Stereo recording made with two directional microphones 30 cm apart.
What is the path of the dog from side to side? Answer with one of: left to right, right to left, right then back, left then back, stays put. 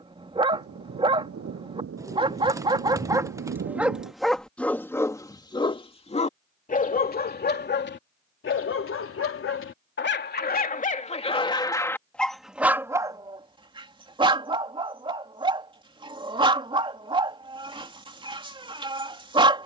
left then back.